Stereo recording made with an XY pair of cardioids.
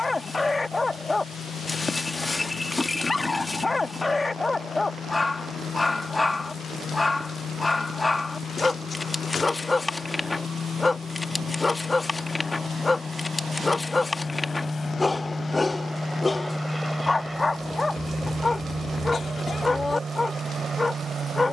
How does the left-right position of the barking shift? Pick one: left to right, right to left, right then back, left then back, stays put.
stays put.